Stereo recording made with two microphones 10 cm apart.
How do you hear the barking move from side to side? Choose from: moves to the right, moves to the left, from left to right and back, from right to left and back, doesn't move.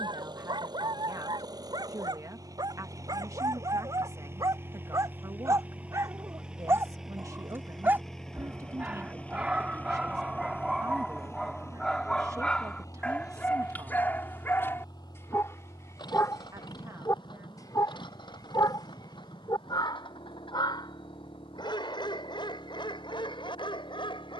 moves to the left.